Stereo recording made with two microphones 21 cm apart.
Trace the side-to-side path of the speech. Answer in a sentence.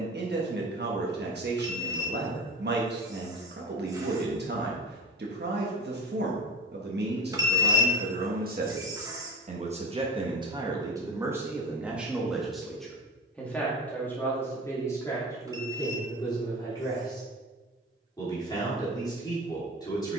You can hear the speech move from right to left.